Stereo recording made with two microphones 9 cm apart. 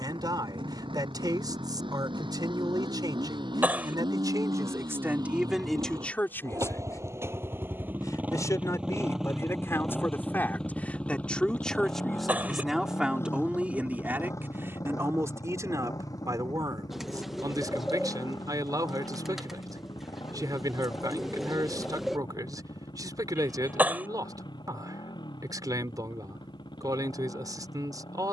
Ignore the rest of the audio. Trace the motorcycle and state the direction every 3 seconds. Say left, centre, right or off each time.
right, right, right, centre, left, left, left, left, left, left.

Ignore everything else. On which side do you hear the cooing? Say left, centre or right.
centre.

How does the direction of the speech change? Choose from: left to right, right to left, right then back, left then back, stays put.
left then back.